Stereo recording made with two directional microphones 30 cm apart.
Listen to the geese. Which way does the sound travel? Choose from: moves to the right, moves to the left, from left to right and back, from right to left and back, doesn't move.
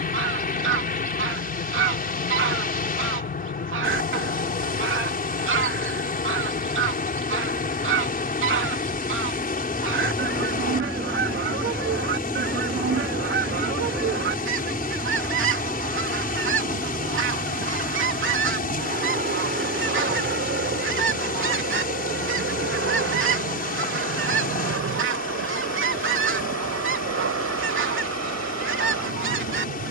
doesn't move.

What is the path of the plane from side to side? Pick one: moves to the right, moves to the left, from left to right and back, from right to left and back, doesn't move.
moves to the right.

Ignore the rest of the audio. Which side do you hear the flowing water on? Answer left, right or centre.
left.